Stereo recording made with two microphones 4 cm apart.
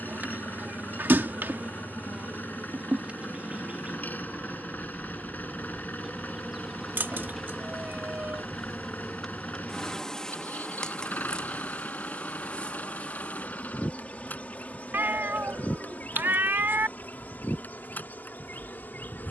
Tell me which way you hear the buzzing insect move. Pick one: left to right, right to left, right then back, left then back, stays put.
right to left.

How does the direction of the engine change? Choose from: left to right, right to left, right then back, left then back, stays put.
stays put.